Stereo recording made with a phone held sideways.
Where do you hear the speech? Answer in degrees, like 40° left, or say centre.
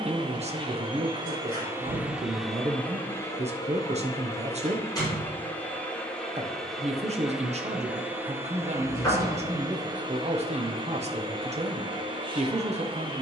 40° right.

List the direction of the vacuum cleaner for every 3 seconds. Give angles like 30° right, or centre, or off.
20° right, 20° left, 10° right, 30° right, 30° right.